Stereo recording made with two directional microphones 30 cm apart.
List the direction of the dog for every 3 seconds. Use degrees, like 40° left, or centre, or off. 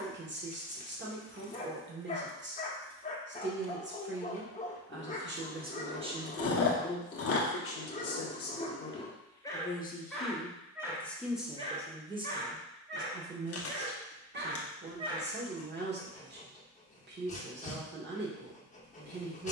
20° left, 20° left, 20° left, centre, 30° right, 20° left, 20° left.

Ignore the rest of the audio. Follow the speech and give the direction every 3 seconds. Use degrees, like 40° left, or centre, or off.
40° right, 30° right, 30° left, 10° left, 30° right, 30° right, 30° right.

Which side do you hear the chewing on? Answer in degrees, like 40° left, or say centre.
50° left.